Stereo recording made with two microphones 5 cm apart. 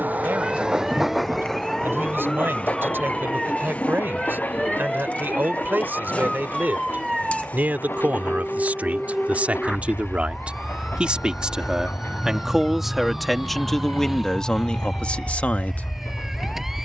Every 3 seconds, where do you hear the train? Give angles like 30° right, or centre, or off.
centre, 30° left, 40° left, 50° left, 50° left, 50° left.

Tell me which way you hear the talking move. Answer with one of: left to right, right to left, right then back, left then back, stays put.
right to left.